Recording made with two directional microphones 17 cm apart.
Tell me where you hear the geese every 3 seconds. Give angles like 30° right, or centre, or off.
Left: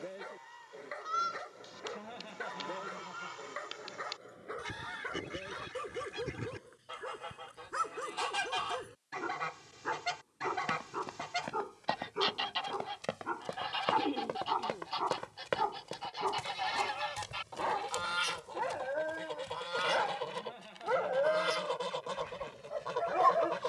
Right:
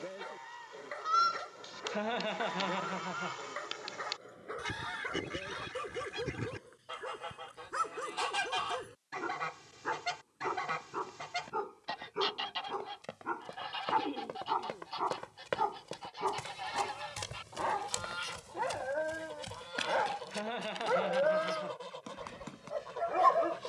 30° right, 20° right, 10° right, centre, 20° left, 30° left, 40° left, 50° left.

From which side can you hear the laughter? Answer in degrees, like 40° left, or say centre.
70° right.